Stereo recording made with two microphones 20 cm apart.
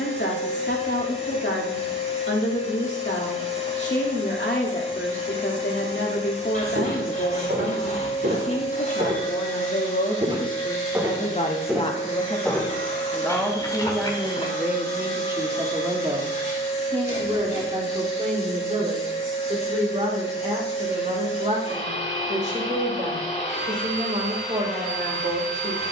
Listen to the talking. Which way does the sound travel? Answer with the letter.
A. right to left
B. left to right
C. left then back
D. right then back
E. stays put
B.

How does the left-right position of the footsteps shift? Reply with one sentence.
In this clip you hear the footsteps move from right to left.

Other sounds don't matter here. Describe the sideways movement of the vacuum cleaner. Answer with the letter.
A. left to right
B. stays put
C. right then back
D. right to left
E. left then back
B.